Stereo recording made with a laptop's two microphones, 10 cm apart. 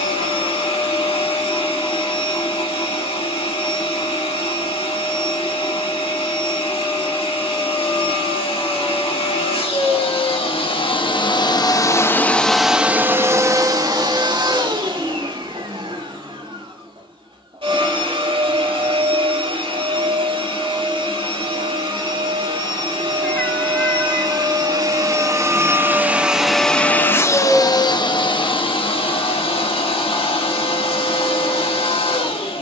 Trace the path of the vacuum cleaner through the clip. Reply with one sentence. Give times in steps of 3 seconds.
In this clip you hear the vacuum cleaner on the left from 0 s, on the right from 12 s and on the left from 27 s.